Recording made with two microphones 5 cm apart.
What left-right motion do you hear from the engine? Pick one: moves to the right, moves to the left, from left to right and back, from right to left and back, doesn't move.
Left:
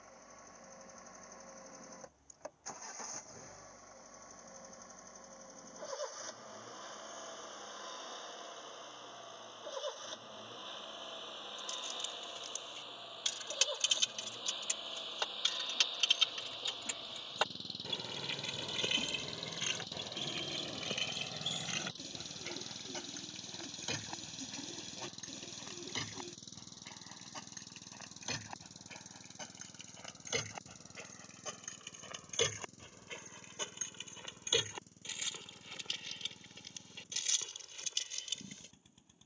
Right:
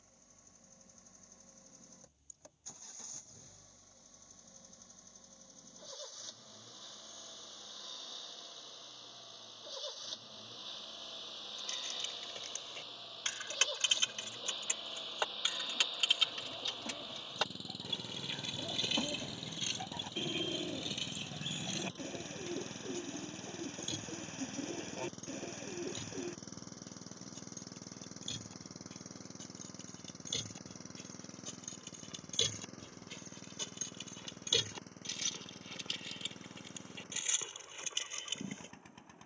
moves to the right.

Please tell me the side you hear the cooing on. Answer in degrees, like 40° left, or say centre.
40° right.